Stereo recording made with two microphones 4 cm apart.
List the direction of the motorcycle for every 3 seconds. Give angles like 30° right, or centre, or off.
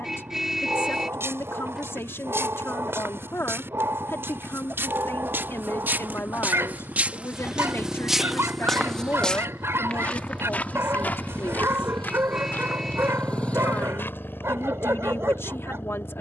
60° right, 50° right, 40° right, 20° right, 30° left, 50° left.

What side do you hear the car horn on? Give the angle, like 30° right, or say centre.
10° right.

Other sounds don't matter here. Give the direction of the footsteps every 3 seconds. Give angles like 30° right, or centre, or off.
80° right, 70° right, 20° right, 40° left, 60° left, off.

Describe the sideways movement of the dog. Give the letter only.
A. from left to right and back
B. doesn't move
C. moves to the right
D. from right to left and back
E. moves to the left
B.